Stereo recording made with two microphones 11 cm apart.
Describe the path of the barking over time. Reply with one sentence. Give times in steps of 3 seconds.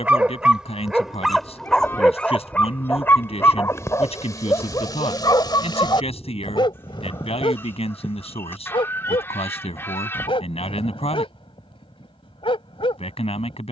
In this clip you hear the barking in the centre from 0 s and on the left from 3 s.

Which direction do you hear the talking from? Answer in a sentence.
In this clip you hear the talking on the left.